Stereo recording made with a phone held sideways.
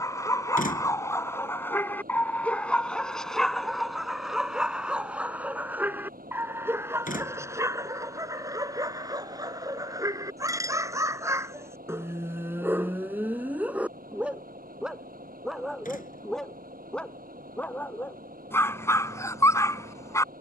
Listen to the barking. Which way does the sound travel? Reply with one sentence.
You can hear the barking move from left to right and back again.